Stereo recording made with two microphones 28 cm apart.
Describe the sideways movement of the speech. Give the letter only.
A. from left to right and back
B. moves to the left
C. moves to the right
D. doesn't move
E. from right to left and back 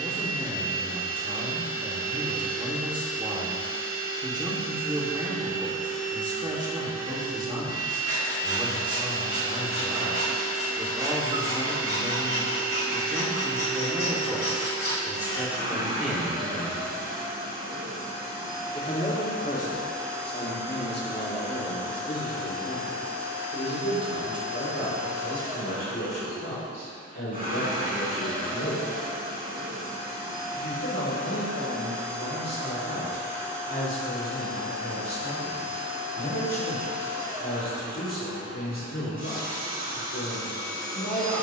B.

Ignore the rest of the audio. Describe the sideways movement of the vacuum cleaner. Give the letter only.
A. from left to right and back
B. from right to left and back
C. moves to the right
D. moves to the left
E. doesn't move
E.